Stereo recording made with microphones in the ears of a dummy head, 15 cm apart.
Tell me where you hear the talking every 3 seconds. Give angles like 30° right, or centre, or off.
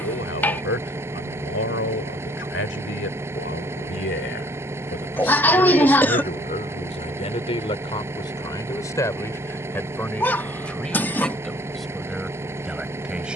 80° left, 70° left, 30° left, 10° left, centre.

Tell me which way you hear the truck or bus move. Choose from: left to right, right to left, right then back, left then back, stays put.
stays put.